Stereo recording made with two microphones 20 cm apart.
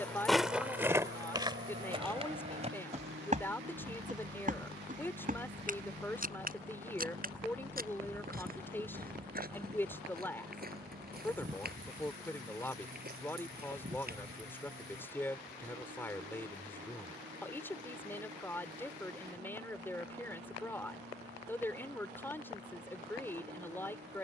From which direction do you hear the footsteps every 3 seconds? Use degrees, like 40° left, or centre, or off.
20° right, 40° right, 50° right, 50° right, 50° right, off, off, off.